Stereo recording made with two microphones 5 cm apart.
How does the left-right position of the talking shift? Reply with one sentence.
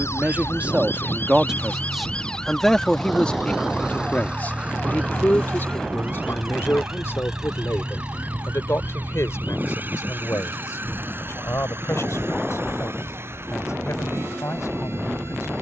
In this clip you hear the talking travel towards the left.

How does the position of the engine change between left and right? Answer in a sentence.
In this clip you hear the engine travel towards the right.